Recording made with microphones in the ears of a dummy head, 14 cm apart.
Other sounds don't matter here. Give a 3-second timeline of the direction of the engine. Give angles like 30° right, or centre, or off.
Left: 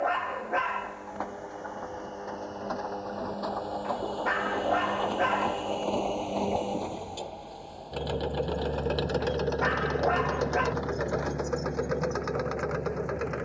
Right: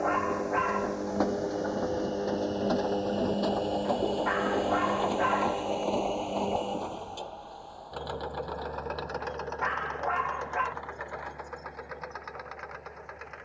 50° right, 20° right, 20° left, 50° left, 60° left.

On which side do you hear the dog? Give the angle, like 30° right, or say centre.
40° left.